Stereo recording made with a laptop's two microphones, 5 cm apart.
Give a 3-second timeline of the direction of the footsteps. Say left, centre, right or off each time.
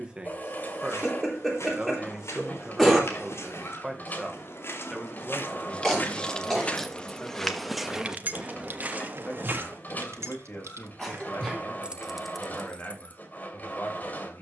left, left, centre, right, off.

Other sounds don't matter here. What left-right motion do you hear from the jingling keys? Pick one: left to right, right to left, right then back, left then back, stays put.
right then back.